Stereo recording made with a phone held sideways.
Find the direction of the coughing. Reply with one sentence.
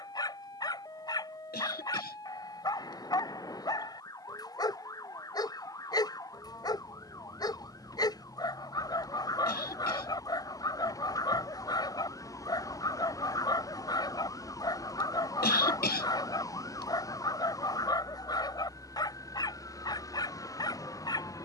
In this clip you hear the coughing on the left.